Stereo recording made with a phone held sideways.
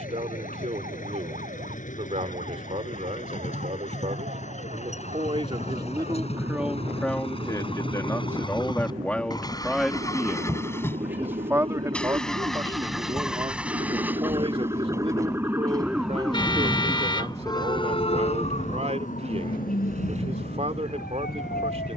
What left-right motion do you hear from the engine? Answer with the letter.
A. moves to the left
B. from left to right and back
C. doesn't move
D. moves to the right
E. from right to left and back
D.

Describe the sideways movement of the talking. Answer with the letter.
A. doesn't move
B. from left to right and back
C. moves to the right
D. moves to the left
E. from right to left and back
E.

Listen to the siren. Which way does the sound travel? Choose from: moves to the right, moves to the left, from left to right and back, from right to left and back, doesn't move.
moves to the left.